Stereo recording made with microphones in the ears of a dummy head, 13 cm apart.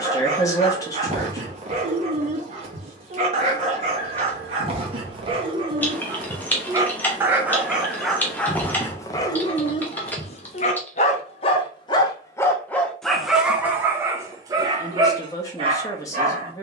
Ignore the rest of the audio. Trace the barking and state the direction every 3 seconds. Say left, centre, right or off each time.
right, right, centre, left, centre, right.